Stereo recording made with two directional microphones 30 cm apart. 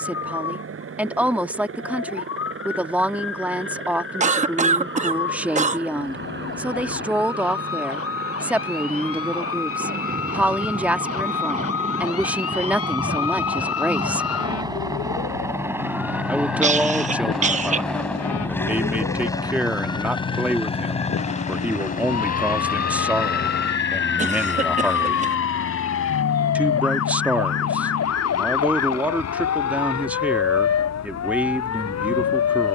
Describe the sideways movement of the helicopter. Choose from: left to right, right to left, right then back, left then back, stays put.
right to left.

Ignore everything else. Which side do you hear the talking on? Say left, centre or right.
centre.